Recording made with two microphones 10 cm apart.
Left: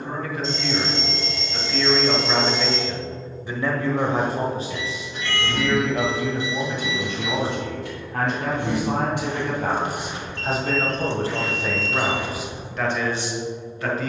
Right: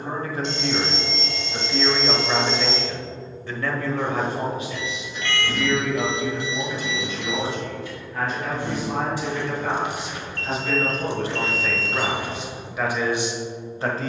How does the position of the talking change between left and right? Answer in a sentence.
In this clip you hear the talking go left and come back.